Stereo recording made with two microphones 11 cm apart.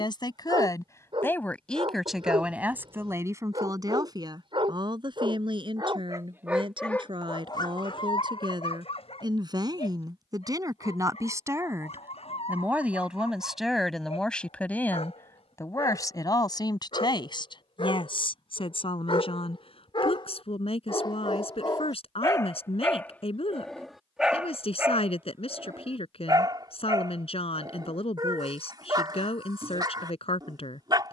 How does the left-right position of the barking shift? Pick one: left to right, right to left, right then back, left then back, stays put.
left then back.